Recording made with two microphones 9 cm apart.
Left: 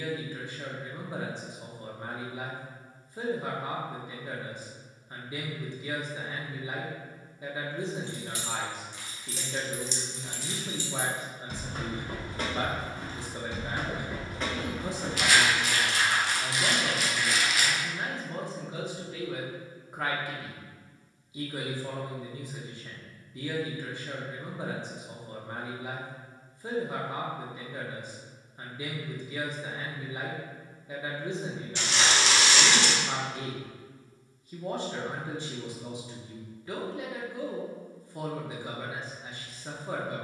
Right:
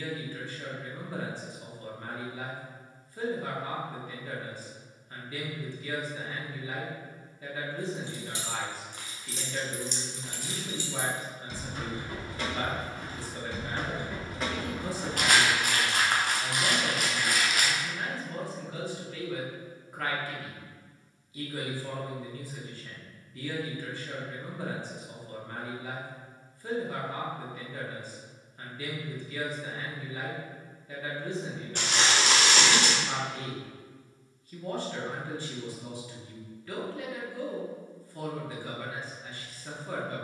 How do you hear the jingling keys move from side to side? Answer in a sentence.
You can hear the jingling keys move from right to left and back again.